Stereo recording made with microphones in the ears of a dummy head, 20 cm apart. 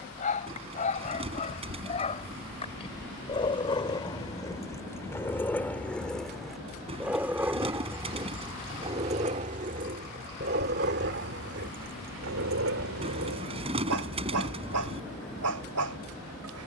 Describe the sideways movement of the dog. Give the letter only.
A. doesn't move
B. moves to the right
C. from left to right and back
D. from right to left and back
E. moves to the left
B.